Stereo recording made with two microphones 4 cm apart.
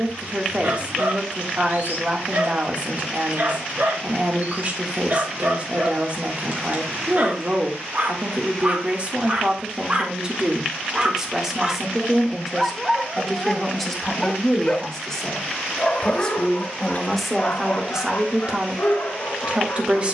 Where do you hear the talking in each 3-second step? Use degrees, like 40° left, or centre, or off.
30° right, 30° right, 30° right, 20° right, centre, 10° left, 30° right.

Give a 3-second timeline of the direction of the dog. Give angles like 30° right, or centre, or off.
60° right, 50° right, 40° right, 30° right, centre, 40° left, 60° left.